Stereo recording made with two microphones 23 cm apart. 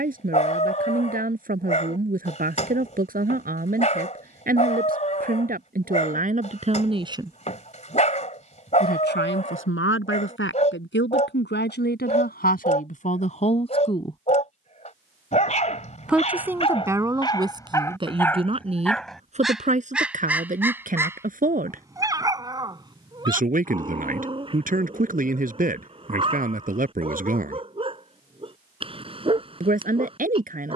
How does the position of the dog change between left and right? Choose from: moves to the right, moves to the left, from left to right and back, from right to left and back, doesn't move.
moves to the right.